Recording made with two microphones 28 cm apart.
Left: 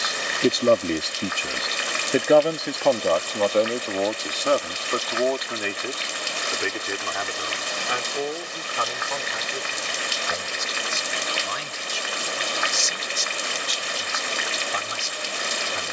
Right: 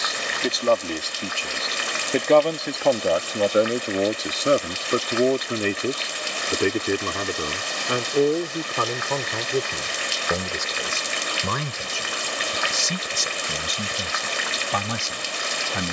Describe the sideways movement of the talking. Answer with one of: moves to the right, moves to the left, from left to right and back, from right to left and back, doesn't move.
moves to the right.